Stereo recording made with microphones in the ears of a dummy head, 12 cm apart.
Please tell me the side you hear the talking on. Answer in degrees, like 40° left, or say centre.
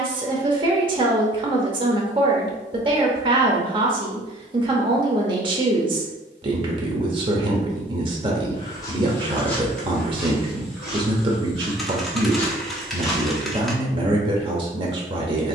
40° right.